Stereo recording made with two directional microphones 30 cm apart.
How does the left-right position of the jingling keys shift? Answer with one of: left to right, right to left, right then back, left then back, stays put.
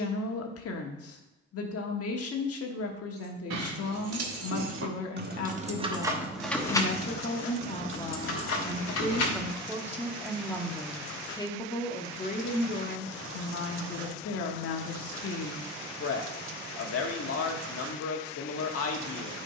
right to left.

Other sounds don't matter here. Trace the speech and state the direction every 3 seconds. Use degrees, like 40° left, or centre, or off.
50° left, 50° left, 30° left, centre, 40° left, 50° left, 50° left.